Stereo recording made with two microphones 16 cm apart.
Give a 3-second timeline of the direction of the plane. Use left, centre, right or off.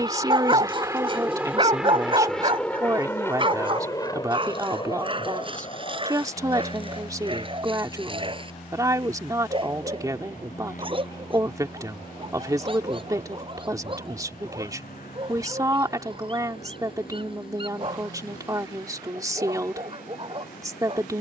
centre, left, left, left, left, left, left.